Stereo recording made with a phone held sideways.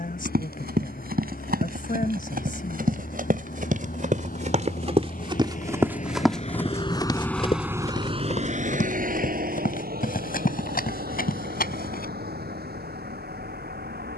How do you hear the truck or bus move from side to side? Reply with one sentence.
You can hear the truck or bus move from left to right.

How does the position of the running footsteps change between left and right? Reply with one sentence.
You can hear the running footsteps move to the left.